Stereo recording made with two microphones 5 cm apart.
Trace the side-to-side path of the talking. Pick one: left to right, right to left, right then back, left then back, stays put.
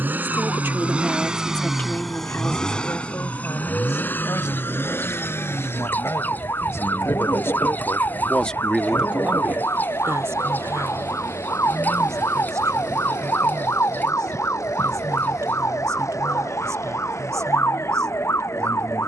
left then back.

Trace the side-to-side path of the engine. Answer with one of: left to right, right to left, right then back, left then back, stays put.
right to left.